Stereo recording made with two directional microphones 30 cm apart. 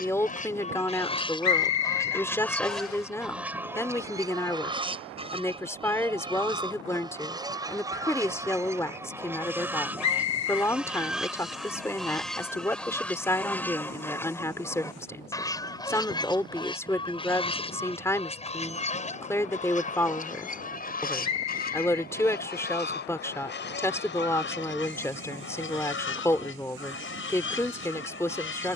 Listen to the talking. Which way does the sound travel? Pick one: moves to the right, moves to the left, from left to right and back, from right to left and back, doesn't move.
doesn't move.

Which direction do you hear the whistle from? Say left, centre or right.
left.